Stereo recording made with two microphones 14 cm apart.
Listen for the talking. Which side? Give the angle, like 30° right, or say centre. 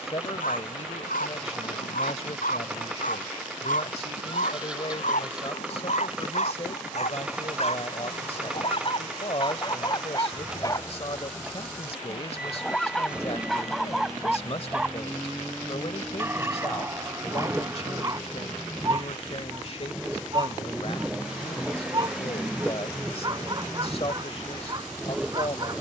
40° left.